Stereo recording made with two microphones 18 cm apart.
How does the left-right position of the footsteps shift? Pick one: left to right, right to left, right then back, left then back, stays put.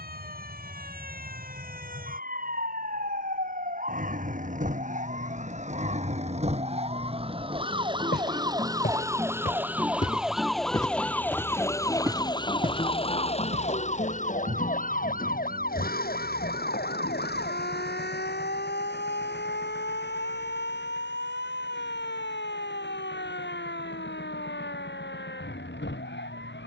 left to right.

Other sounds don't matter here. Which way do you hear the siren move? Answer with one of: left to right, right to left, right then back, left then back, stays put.
right to left.